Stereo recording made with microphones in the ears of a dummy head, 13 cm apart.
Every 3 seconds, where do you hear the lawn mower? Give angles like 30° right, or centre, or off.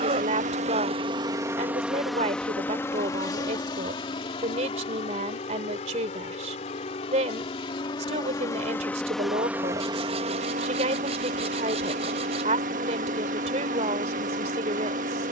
20° right, 40° left, 30° left, 40° right, 50° right.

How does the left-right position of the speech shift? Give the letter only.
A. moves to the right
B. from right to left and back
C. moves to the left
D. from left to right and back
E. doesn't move
E.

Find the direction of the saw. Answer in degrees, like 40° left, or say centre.
40° right.